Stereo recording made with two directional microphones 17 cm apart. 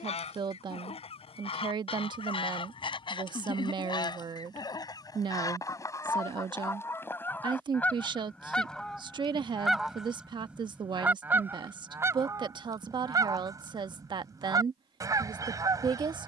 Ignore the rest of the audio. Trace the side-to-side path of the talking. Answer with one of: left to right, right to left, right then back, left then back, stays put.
stays put.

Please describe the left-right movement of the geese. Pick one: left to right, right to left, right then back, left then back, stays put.
left to right.